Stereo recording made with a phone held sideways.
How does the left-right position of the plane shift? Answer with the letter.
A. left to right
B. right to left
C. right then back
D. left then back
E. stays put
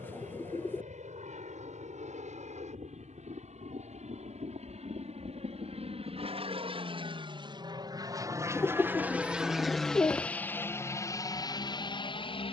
B.